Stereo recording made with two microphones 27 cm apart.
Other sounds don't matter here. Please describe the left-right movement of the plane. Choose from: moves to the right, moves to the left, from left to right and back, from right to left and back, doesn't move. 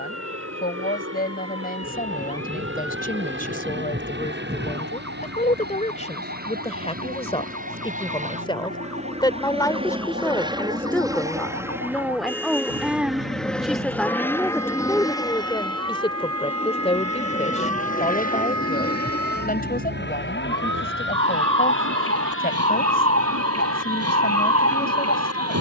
moves to the left.